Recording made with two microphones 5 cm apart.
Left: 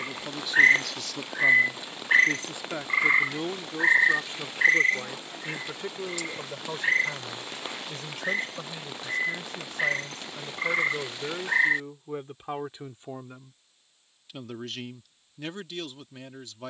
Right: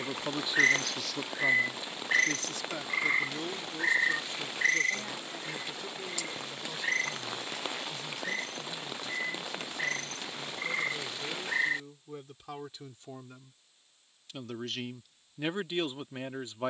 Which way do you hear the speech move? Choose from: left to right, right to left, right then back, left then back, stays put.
left then back.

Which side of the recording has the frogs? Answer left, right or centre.
left.